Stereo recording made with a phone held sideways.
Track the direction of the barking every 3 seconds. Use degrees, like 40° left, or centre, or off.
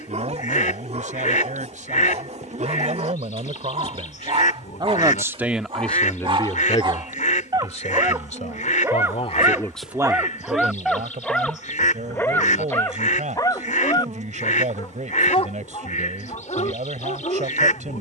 60° right, 50° right, 30° right, centre, 30° left, 50° left.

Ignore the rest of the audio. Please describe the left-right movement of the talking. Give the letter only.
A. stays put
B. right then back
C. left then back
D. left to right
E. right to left
C.